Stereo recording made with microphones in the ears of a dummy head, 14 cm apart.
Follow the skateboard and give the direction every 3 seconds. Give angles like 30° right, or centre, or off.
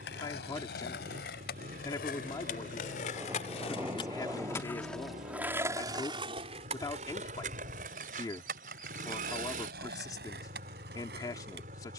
70° left, 20° left, 50° right, 70° right.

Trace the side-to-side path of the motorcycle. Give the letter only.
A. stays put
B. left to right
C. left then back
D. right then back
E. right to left
A.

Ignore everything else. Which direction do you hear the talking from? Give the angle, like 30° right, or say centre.
20° left.